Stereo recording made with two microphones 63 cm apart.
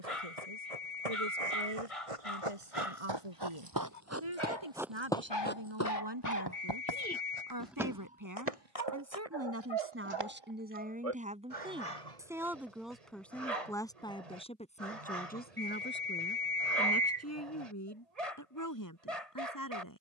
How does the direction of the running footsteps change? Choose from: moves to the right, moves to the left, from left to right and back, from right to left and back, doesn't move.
moves to the left.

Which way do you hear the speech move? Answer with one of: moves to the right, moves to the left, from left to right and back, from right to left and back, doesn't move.
moves to the left.